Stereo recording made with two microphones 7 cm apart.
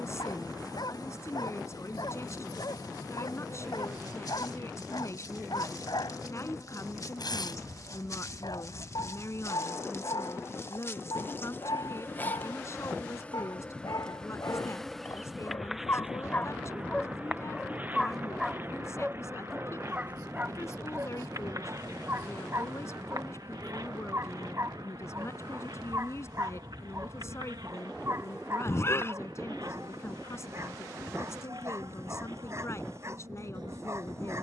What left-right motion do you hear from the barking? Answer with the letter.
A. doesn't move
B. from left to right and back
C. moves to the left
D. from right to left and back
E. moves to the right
E.